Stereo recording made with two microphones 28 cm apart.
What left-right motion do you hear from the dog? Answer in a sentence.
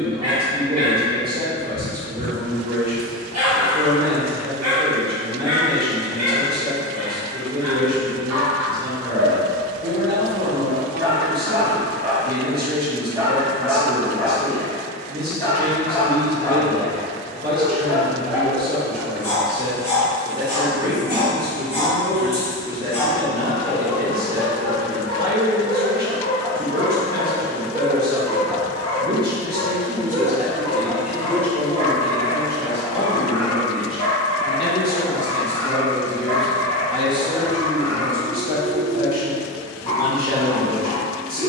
You can hear the dog go from the right side to the left.